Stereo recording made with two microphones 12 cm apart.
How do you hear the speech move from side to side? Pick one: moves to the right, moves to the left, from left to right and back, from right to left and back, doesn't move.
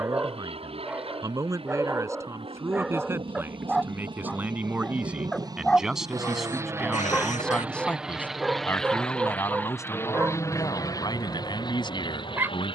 moves to the left.